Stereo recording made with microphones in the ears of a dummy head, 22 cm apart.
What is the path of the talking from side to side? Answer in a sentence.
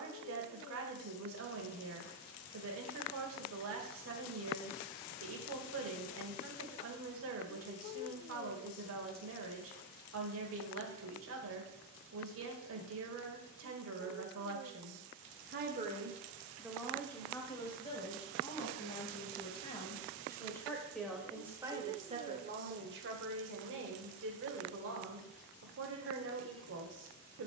In this clip you hear the talking move from right to left and back again.